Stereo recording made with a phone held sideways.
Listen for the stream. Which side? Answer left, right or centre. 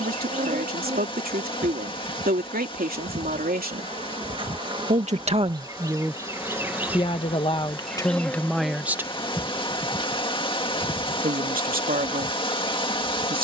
left.